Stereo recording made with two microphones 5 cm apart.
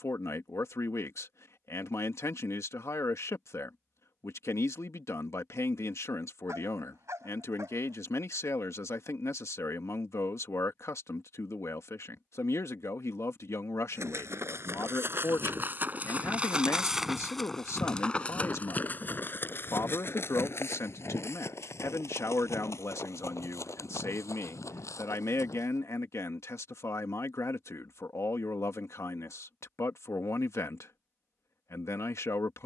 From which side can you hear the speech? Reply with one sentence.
You can hear the speech on the left.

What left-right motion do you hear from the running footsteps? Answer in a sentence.
You can hear the running footsteps move from right to left.